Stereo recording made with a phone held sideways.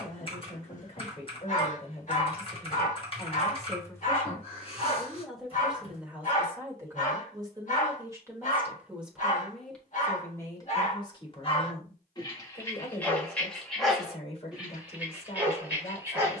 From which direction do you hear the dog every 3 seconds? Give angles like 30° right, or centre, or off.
50° left, 50° left, 50° left, 40° left, 10° left, 10° right.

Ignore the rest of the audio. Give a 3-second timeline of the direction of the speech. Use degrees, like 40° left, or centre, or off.
40° left, 10° left, 20° right, 20° left, 40° left, 40° left.